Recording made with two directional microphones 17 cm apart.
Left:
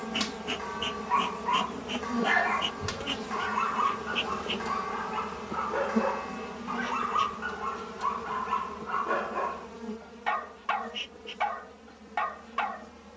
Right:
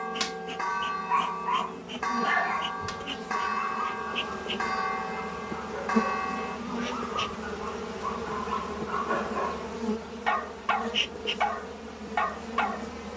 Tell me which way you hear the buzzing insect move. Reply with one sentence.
You can hear the buzzing insect move from left to right.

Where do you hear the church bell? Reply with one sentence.
You can hear the church bell on the right.